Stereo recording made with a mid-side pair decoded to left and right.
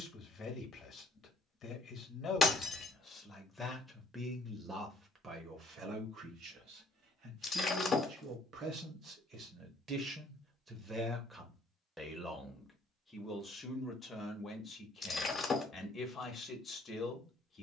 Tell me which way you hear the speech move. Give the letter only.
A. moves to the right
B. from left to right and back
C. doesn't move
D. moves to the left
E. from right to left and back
B.